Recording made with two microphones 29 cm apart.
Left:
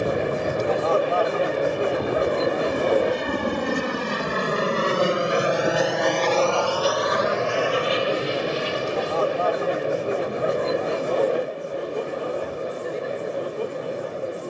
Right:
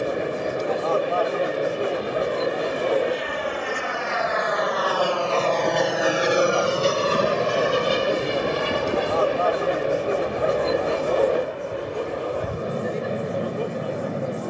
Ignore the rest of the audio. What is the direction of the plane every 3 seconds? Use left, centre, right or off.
left, left, right, right, right.